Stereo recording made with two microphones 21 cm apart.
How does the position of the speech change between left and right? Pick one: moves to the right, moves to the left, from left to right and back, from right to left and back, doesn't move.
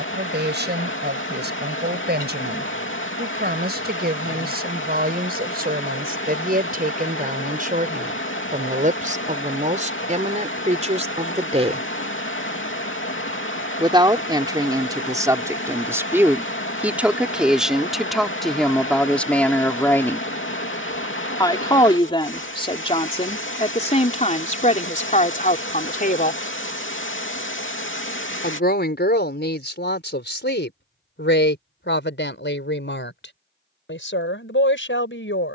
moves to the left.